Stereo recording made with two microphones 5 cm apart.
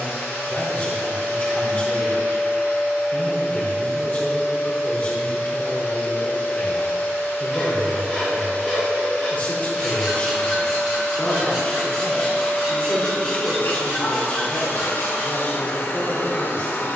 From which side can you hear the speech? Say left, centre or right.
left.